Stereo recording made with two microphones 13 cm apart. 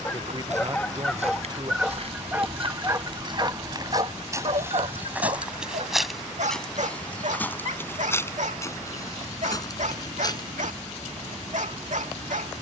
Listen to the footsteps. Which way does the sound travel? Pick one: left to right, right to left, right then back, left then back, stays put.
right to left.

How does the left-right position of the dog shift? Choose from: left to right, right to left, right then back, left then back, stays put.
left to right.